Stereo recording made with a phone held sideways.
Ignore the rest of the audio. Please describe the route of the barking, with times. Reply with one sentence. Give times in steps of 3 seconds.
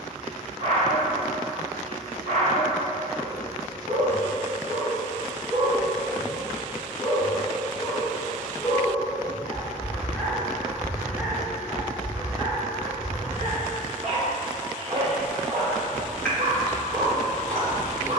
In this clip you hear the barking on the right from 0 s, in the centre from 6 s and on the right from 12 s.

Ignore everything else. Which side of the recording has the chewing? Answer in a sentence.
In this clip you hear the chewing in the centre.